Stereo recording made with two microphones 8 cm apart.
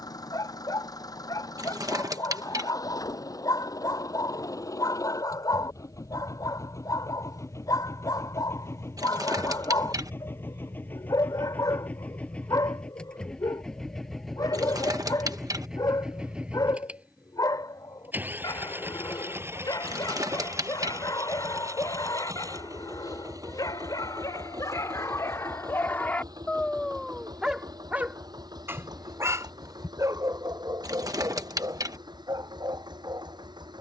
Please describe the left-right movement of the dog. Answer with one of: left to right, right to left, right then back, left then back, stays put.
left to right.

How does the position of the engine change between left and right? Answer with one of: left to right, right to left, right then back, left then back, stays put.
left to right.